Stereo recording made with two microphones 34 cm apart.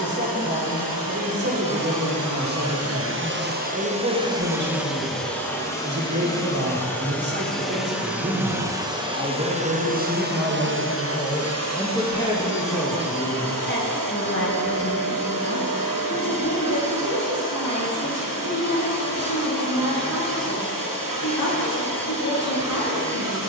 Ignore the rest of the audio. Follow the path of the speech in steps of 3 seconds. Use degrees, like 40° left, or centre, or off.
30° right, 30° right, 30° right, 10° right, 30° left, 50° left, 60° left, 60° left.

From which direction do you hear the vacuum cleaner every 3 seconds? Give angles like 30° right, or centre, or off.
70° right, 10° right, centre, 30° right, 60° right, 70° right, 70° right, 70° right.